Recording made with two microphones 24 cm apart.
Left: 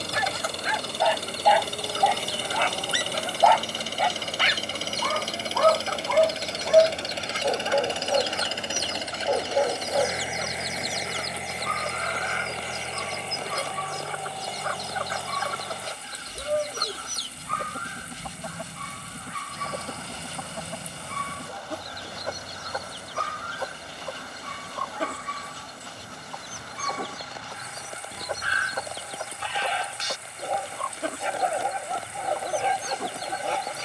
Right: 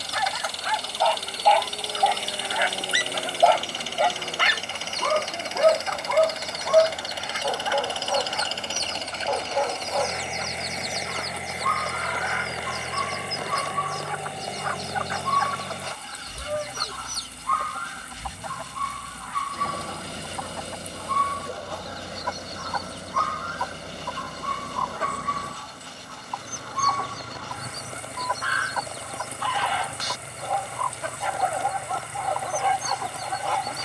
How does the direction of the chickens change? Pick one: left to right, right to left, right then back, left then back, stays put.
stays put.